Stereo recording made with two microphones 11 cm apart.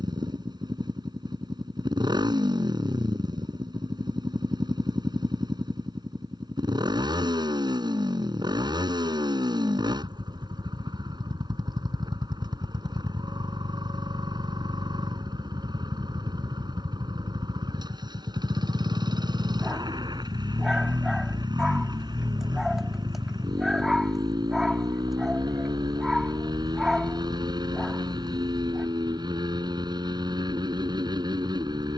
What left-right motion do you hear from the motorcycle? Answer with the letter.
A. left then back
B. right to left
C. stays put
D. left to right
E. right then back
C.